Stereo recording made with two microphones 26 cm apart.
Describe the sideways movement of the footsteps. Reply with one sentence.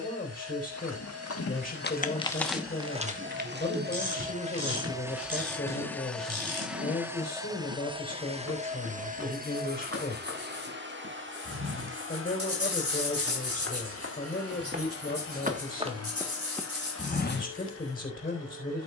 You can hear the footsteps go right and come back.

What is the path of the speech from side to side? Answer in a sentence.
In this clip you hear the speech stay in one place.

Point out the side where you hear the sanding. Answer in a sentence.
You can hear the sanding on the right.